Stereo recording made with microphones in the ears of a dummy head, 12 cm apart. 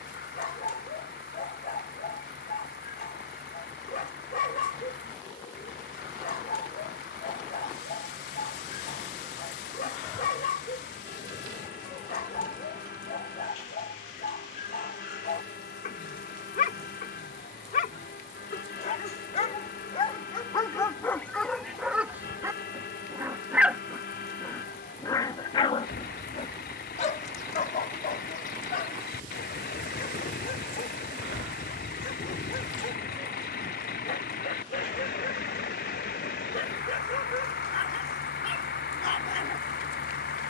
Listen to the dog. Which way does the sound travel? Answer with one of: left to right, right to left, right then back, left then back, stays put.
right then back.